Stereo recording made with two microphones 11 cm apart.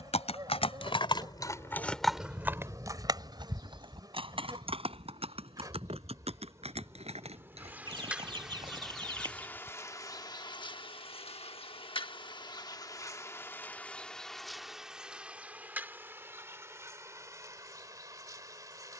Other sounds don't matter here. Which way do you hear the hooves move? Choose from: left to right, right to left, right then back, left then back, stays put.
left to right.